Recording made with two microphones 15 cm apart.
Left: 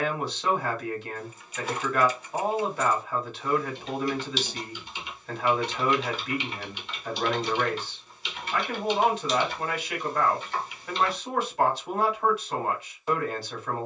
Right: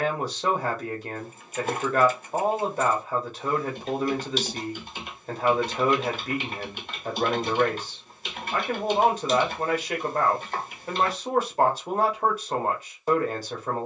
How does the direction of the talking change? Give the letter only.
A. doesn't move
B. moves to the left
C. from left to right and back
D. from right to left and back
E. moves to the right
A.